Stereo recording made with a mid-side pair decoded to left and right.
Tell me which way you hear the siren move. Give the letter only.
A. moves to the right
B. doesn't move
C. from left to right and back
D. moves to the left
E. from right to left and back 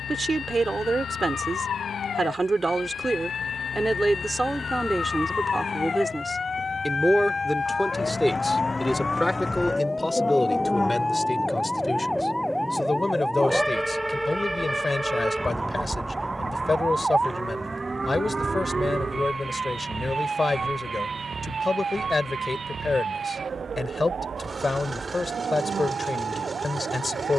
A.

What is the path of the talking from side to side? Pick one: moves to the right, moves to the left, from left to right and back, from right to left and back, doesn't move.
moves to the left.